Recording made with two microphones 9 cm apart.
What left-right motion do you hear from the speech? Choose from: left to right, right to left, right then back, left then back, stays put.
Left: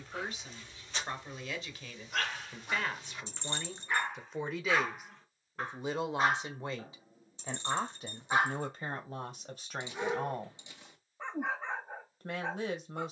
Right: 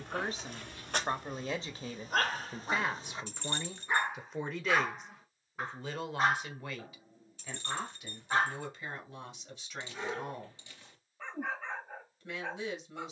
right to left.